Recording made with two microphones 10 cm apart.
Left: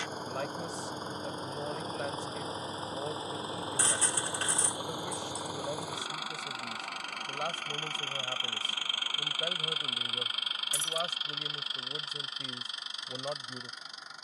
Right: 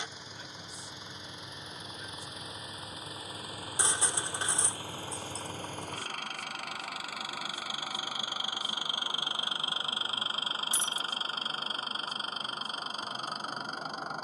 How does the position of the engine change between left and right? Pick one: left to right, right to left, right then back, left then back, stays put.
left to right.